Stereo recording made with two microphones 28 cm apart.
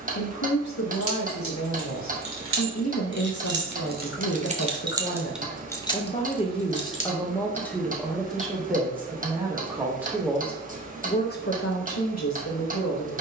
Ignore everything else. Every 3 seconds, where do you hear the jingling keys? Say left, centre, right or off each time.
right, right, left, off, off.